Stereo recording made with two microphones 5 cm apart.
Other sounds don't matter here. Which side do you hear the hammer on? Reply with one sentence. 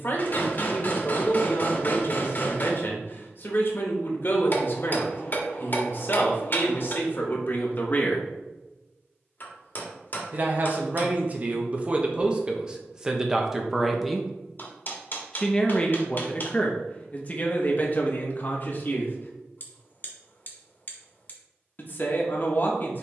You can hear the hammer on the left.